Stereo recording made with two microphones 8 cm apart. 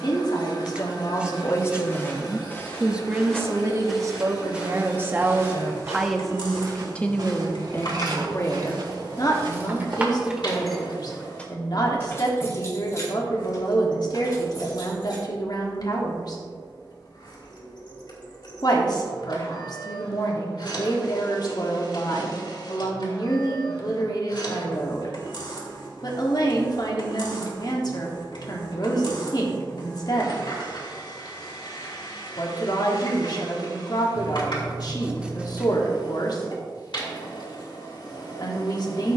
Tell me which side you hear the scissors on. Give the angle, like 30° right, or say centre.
10° right.